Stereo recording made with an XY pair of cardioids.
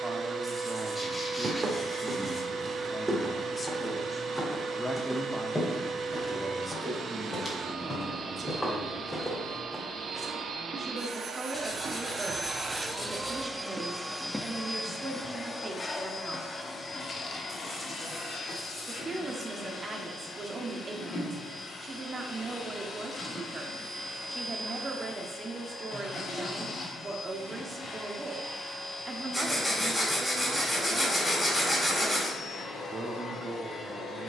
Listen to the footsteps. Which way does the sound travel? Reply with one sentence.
You can hear the footsteps go left and come back.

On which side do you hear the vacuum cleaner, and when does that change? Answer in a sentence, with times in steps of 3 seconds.
In this clip you hear the vacuum cleaner on the right from 0 s, in the centre from 12 s and on the left from 15 s.